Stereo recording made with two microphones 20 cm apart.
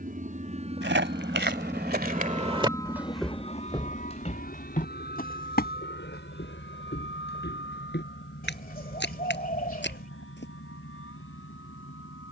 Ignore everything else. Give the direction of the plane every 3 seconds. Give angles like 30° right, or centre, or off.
20° right, 40° left, 60° left, 70° left.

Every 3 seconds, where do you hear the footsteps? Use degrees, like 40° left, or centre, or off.
50° right, 30° left, 60° left, 60° left.